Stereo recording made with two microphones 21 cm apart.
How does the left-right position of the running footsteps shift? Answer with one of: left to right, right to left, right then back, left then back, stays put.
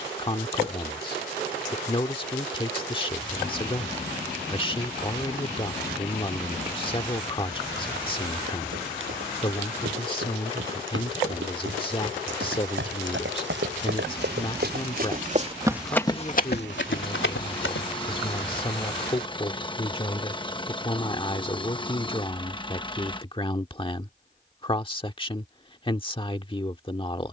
right to left.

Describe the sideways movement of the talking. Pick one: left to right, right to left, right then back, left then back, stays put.
stays put.